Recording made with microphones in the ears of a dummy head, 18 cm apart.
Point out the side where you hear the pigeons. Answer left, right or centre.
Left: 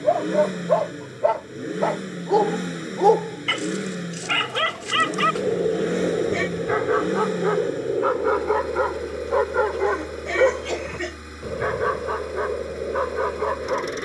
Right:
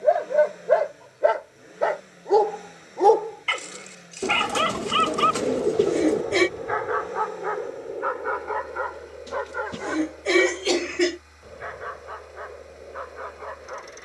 right.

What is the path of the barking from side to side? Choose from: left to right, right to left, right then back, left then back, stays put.
right to left.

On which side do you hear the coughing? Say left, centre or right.
right.